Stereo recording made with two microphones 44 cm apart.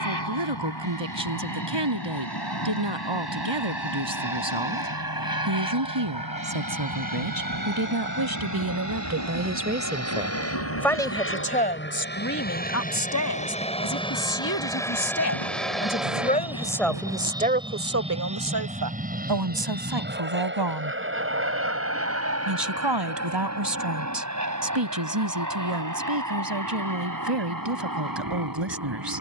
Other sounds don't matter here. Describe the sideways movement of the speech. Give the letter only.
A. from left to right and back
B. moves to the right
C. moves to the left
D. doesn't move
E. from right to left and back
E.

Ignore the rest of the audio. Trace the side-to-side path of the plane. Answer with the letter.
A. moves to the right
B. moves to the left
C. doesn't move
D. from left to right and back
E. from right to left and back
A.